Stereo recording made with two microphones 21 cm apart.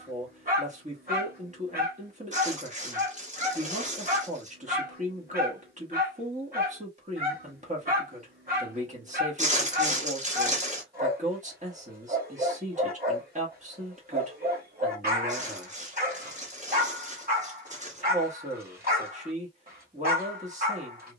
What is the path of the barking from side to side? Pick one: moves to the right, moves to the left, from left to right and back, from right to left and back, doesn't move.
doesn't move.